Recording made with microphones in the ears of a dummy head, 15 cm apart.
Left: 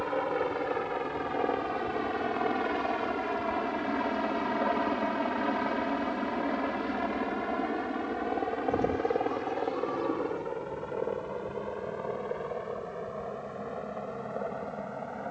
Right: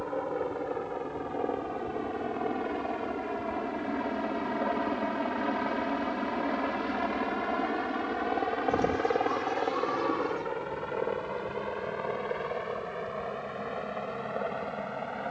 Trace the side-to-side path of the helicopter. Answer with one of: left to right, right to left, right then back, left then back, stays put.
left to right.